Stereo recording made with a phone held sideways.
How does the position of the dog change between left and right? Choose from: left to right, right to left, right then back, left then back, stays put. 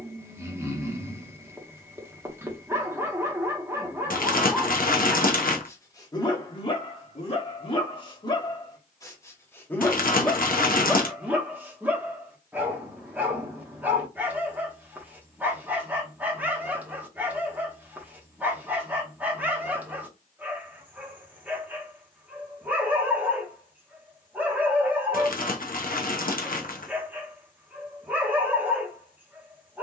left then back.